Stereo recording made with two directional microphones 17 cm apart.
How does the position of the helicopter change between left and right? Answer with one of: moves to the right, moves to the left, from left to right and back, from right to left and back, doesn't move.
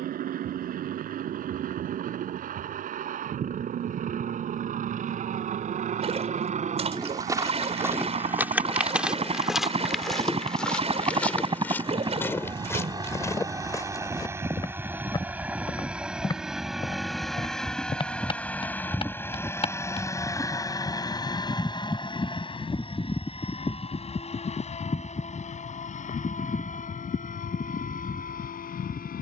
moves to the left.